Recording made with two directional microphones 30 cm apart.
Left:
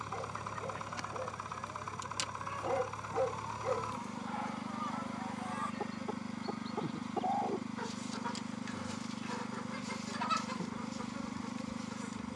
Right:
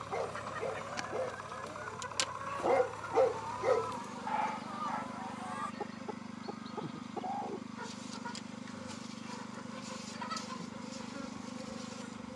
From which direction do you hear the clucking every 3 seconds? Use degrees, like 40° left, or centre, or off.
40° right, 10° right, 30° left, 40° left.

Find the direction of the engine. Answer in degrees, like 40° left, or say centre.
30° left.